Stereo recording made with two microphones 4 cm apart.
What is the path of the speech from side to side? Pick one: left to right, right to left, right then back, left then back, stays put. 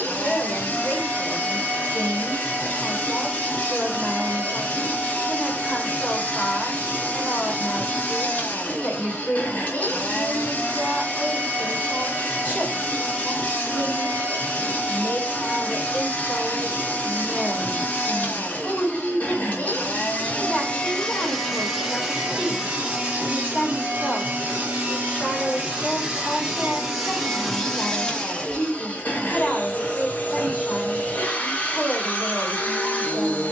stays put.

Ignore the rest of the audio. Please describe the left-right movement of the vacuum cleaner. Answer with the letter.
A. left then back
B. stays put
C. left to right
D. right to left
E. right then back
E.